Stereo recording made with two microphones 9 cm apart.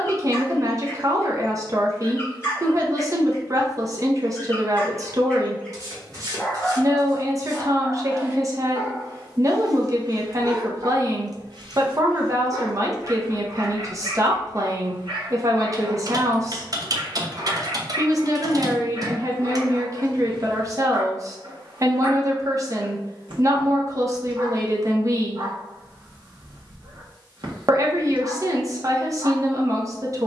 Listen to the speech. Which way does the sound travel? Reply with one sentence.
In this clip you hear the speech stay put.